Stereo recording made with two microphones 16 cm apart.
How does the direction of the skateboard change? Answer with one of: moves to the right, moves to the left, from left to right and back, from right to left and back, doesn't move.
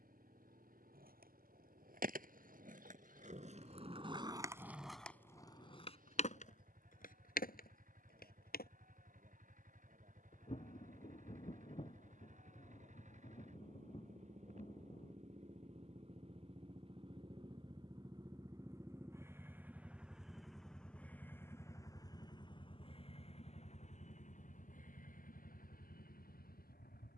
moves to the left.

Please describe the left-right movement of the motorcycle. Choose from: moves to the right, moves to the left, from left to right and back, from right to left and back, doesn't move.
moves to the left.